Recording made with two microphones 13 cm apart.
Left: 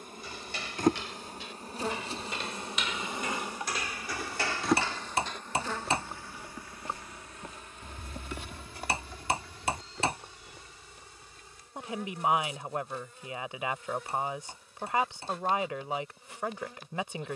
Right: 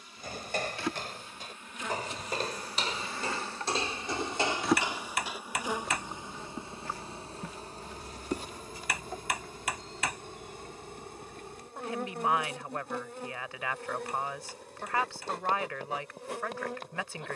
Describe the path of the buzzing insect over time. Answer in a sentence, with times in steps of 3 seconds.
In this clip you hear the buzzing insect on the left from 0 s, in the centre from 3 s and on the right from 6 s.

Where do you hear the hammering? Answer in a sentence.
In this clip you hear the hammering on the left.